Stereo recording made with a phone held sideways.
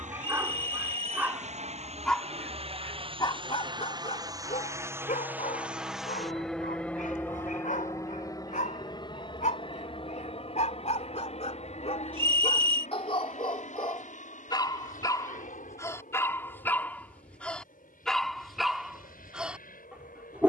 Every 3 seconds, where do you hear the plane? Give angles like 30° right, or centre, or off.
50° right, 20° right, 10° left, 40° left, 50° left, 60° left, 60° left.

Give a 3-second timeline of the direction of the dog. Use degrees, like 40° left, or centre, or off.
centre, 50° left, 60° left, 50° left, 40° left, 20° left, centre.